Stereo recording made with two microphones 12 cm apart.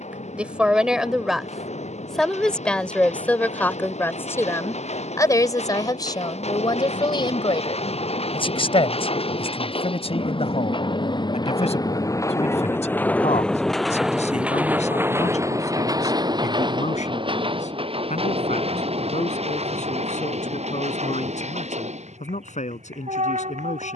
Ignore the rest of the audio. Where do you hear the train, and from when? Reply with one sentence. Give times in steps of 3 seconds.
You can hear the train on the left from 0 s, in the centre from 12 s and on the right from 15 s.